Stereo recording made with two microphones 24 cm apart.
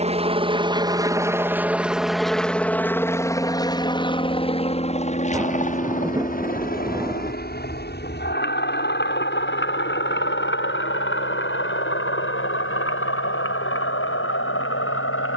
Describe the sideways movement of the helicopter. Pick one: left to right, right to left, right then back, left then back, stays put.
right to left.